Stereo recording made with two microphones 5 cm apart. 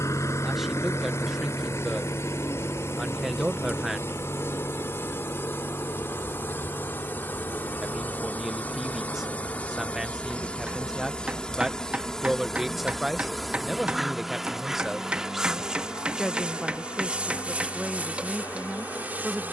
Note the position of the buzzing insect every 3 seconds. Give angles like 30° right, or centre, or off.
60° left, 50° left, 40° left, 20° left, centre, 20° right, 30° right.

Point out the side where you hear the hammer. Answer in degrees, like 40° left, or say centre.
20° right.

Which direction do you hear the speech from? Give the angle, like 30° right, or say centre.
centre.